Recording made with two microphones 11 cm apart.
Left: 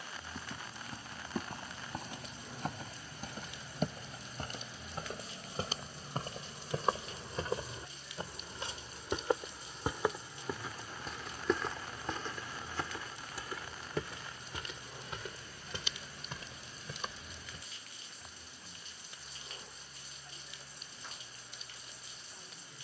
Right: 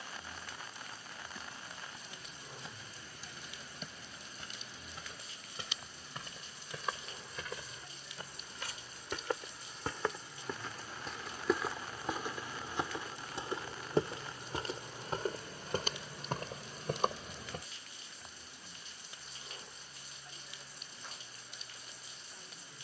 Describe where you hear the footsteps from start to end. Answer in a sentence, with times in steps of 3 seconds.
In this clip you hear the footsteps on the left from 0 s, in the centre from 9 s, on the right from 12 s and not at all from 18 s.